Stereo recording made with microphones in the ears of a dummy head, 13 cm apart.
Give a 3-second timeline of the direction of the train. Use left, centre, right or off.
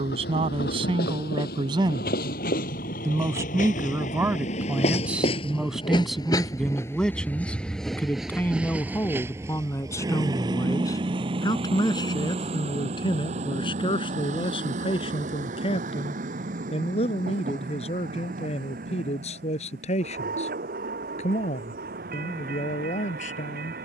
left, left, centre, right, right, right, right, right.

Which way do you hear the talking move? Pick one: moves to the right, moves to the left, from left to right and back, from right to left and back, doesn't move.
moves to the left.